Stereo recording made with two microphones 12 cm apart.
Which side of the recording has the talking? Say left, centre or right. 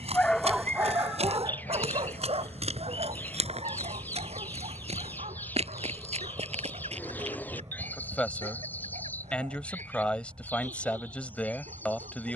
centre.